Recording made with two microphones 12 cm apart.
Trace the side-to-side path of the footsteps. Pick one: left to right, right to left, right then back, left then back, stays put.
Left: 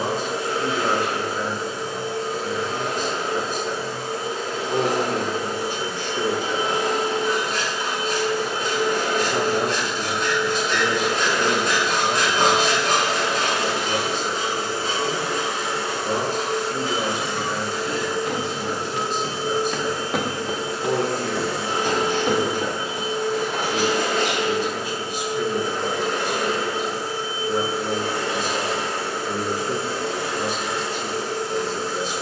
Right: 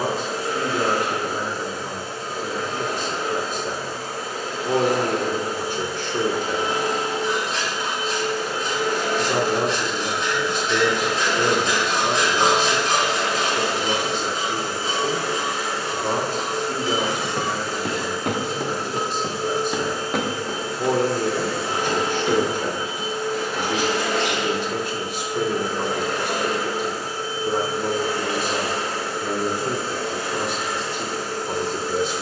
right to left.